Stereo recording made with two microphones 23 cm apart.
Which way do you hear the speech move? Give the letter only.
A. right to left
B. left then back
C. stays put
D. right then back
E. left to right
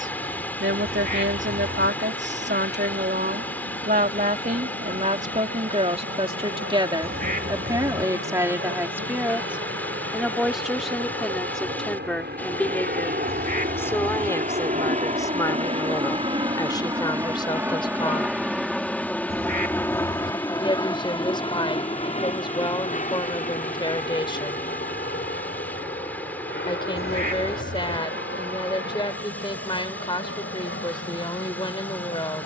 A.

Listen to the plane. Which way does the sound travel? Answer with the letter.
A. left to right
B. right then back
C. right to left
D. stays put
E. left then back
C.